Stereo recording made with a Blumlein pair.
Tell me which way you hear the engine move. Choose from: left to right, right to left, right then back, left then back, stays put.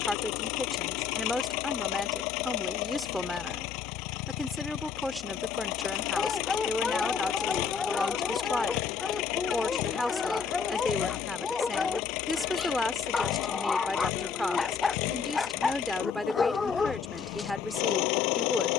stays put.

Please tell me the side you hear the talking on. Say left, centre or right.
centre.